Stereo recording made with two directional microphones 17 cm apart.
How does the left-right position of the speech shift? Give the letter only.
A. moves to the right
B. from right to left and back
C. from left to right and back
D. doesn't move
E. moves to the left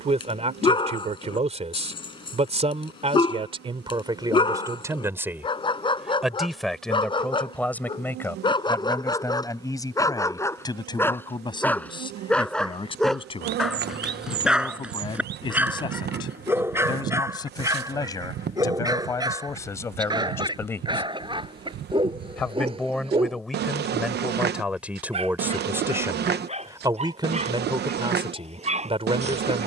B.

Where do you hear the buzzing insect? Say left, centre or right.
right.